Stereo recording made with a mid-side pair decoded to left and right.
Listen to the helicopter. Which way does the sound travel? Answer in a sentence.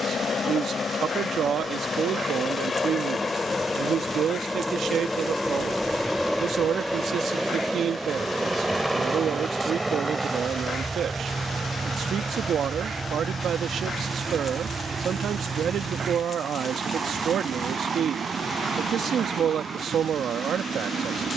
You can hear the helicopter move from left to right.